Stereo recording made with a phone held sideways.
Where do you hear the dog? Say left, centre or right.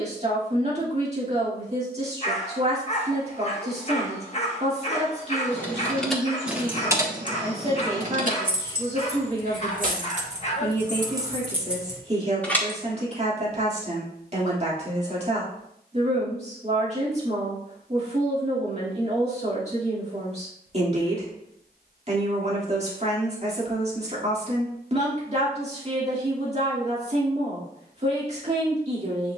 left.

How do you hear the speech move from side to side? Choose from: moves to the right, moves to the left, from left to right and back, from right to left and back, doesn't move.
doesn't move.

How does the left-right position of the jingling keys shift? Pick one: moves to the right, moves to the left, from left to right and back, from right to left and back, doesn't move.
from left to right and back.